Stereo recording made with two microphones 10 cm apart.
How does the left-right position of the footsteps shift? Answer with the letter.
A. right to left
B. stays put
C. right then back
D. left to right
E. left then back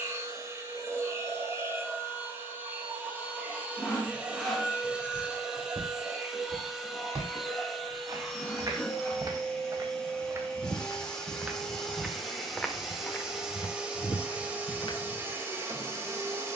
A.